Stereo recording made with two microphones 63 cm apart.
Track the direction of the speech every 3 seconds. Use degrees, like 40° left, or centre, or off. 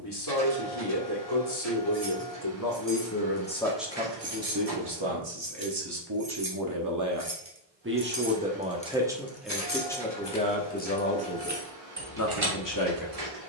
40° left, 20° right, 20° right, 10° left, 30° left.